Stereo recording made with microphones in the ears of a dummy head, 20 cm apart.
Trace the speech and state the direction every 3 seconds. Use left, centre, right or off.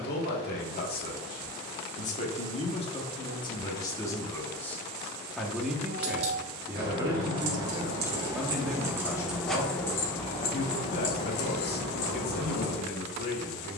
left, centre, centre, left, left.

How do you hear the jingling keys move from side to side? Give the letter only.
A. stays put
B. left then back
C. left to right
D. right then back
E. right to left
E.